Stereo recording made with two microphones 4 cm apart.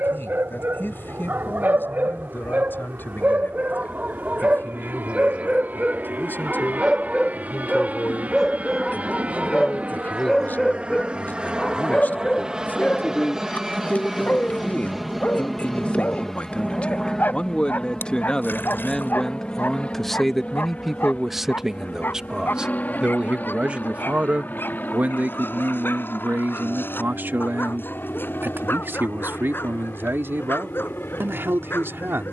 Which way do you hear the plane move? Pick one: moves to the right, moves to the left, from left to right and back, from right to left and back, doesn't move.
moves to the left.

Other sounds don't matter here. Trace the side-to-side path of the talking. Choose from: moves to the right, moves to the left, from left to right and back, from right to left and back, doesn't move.
moves to the right.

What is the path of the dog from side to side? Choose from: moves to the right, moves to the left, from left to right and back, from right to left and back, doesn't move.
moves to the left.